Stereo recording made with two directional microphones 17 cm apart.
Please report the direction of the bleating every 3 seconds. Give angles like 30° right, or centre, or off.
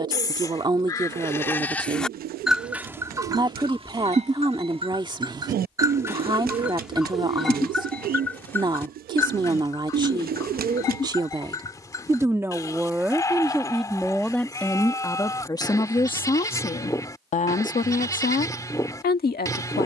10° left, 30° right, centre, 20° left, 20° left, 20° left, 20° left.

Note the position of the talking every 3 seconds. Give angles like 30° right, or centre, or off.
30° right, 30° right, 30° right, 30° right, centre, 30° left, 60° left.